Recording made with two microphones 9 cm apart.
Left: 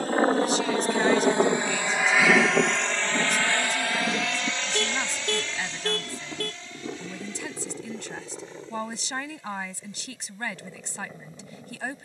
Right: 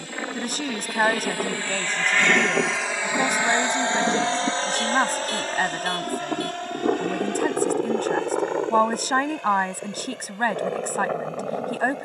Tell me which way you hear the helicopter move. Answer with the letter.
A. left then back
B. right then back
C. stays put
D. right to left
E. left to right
E.